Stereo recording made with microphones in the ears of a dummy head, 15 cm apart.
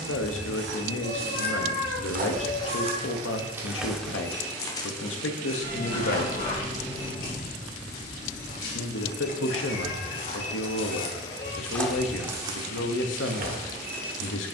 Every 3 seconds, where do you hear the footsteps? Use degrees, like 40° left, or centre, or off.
60° right, 10° left, 50° left, 40° left, 40° right.